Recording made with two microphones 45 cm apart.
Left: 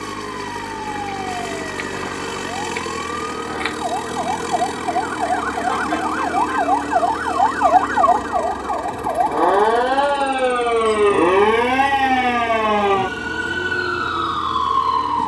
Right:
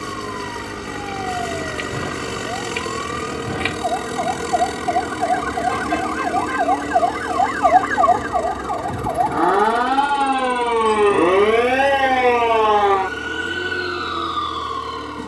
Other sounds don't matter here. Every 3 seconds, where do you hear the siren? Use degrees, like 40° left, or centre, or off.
60° right, 50° right, 40° right, 10° right, 60° left.